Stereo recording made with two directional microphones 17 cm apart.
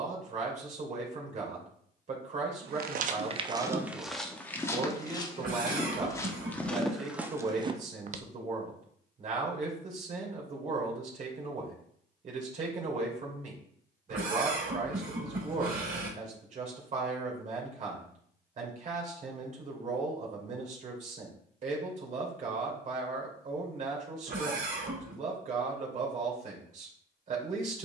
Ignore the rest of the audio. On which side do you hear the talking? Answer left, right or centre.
right.